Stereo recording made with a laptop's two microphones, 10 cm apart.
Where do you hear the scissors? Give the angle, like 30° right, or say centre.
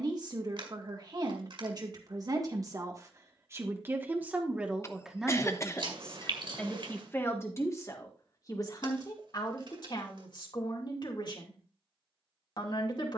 60° right.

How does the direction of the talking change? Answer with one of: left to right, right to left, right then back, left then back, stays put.
right to left.